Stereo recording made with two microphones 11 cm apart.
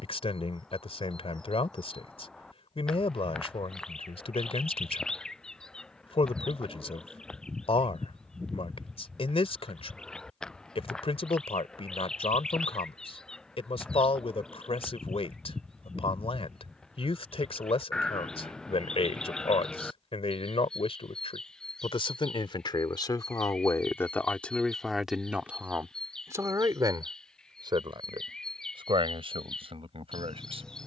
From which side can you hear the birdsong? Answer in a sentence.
You can hear the birdsong in the centre.